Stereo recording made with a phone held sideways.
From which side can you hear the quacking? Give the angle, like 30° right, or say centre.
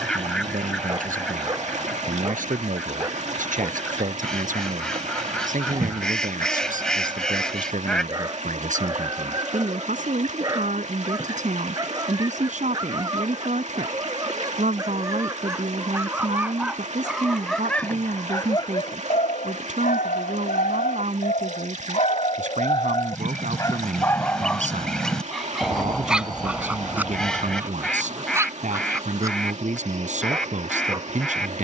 centre.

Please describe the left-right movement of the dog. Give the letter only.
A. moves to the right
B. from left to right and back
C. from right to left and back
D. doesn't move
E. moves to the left
C.